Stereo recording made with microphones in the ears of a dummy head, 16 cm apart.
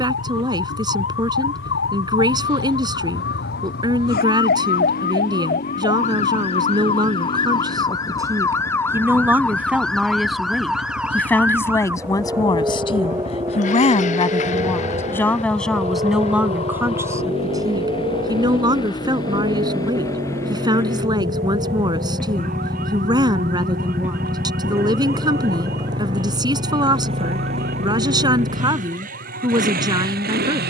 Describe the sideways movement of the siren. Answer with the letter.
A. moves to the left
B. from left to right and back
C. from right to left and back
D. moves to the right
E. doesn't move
D.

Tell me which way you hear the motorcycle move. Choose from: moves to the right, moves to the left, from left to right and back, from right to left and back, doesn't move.
moves to the right.